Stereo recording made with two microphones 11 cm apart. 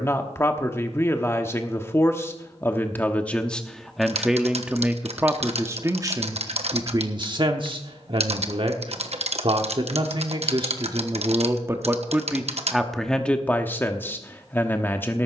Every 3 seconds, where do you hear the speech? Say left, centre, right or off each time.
left, centre, right, right, centre.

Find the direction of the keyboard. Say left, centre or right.
right.